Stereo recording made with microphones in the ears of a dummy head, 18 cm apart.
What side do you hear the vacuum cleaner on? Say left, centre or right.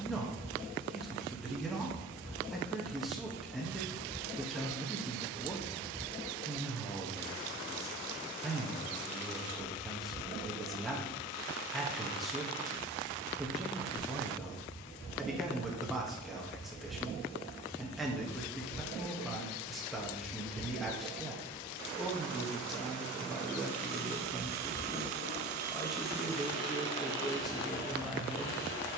right.